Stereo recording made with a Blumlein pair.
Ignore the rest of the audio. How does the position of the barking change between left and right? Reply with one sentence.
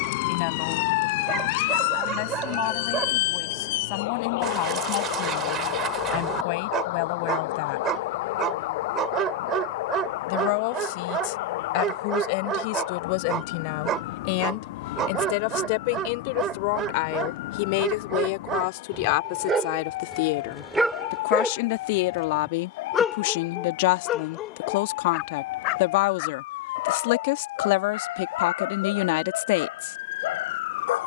In this clip you hear the barking move from right to left.